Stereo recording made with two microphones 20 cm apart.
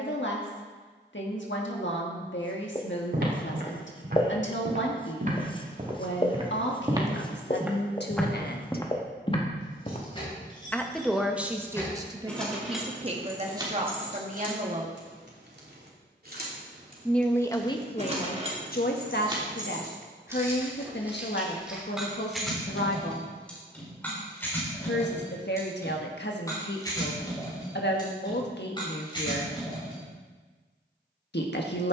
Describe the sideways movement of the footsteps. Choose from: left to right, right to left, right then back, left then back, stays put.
right to left.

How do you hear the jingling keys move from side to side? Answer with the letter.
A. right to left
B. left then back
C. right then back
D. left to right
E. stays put
C.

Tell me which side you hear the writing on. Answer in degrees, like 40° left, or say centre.
20° left.